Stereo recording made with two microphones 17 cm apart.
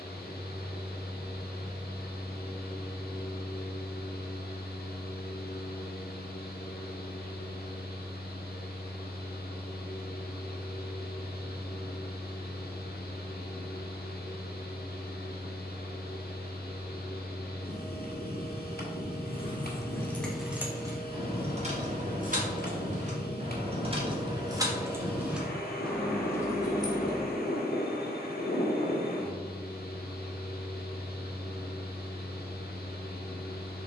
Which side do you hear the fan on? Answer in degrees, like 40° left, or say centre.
70° left.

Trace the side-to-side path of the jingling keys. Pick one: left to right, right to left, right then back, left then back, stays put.
right then back.